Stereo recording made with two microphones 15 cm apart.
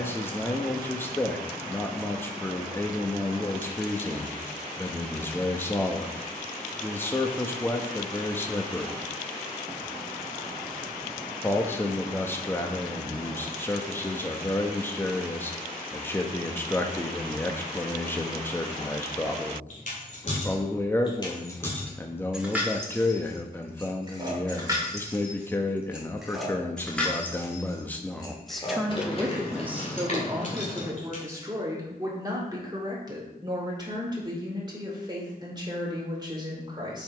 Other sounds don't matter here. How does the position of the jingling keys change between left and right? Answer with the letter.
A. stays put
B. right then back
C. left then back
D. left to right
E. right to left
B.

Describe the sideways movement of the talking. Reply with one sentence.
You can hear the talking go from the left side to the right.